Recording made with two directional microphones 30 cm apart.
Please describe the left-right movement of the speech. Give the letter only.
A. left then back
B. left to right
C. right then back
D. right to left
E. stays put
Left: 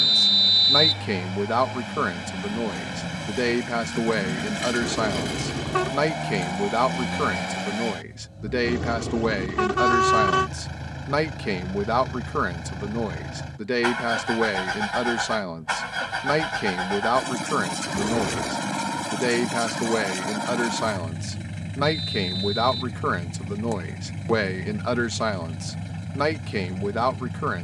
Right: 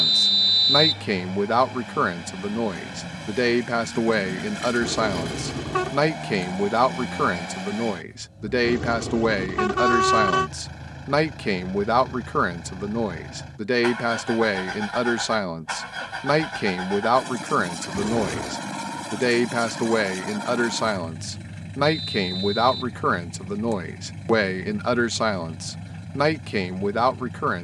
E.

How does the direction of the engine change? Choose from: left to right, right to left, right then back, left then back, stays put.
stays put.